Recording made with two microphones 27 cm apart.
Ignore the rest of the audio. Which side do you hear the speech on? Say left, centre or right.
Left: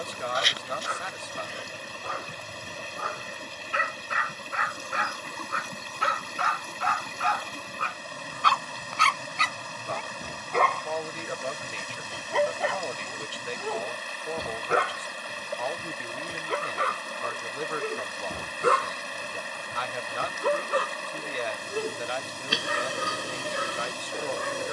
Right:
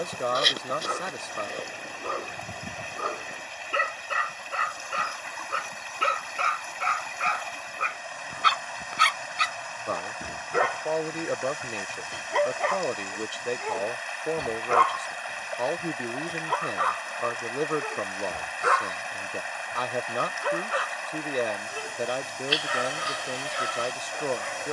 right.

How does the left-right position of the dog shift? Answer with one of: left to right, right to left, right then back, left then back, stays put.
right to left.